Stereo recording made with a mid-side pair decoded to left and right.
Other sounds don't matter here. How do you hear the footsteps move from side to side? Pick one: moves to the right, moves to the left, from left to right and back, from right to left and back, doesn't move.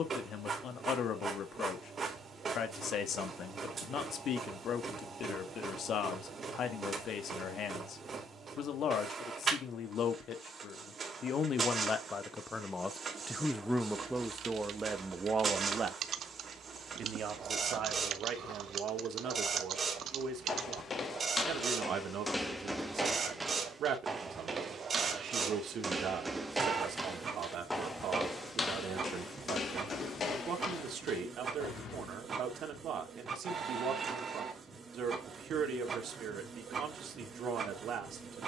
from left to right and back.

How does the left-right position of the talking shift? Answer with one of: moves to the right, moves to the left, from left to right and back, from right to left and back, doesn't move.
moves to the right.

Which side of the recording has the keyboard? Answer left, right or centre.
right.